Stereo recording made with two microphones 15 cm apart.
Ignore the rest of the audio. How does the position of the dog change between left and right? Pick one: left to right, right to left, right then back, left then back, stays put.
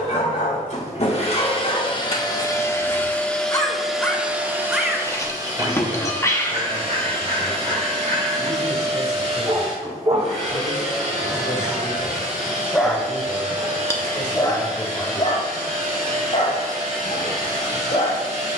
right then back.